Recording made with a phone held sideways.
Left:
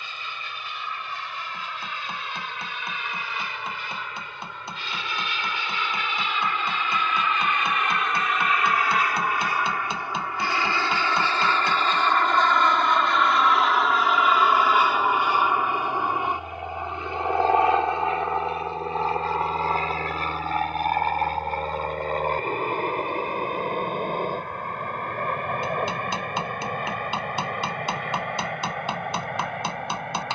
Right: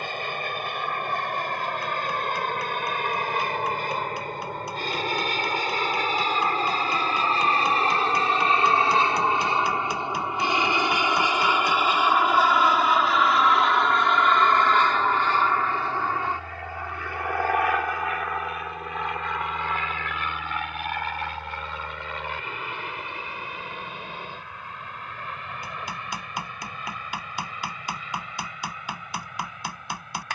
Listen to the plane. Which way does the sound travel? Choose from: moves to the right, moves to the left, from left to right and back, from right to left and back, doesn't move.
moves to the left.